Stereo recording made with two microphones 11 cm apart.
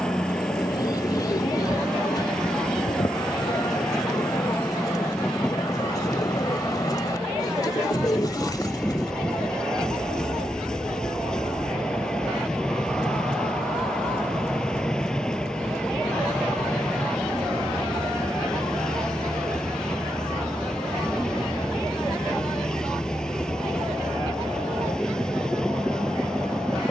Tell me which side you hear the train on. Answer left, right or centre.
centre.